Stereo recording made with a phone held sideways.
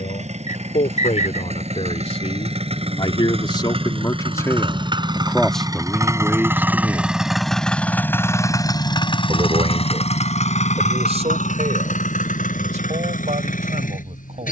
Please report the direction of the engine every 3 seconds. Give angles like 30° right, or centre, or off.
50° right, 40° right, centre, 60° left, 80° left.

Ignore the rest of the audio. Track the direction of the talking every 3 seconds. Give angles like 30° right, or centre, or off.
50° left, 20° left, 10° right, 50° right, 60° right.